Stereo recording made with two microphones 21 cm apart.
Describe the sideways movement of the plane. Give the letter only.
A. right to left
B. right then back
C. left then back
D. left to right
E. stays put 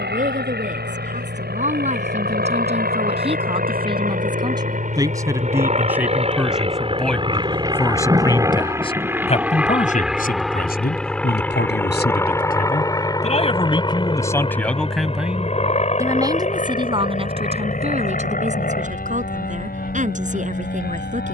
A.